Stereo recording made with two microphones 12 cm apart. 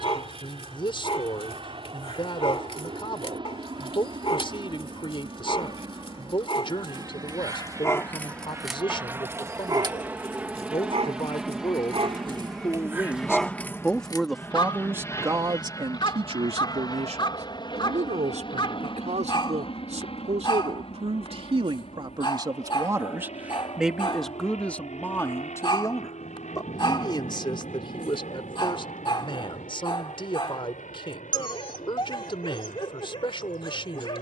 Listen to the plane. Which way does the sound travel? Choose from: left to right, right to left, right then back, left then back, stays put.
right to left.